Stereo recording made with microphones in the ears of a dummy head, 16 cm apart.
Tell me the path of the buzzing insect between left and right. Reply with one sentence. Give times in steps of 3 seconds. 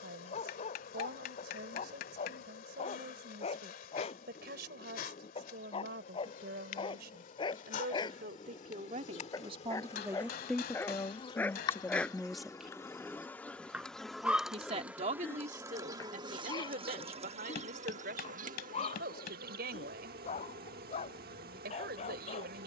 In this clip you hear the buzzing insect on the left from 0 s, in the centre from 12 s and on the right from 15 s.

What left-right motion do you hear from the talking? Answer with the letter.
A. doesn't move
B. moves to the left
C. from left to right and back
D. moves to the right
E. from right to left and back
E.